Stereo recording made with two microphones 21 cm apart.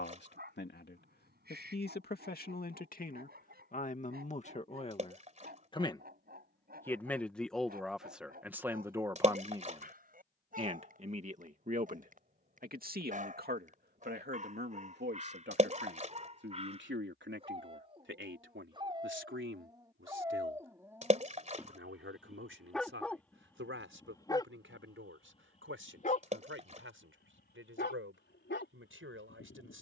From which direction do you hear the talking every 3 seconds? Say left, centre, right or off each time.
left, left, centre, right, right, right, right, right, right, right.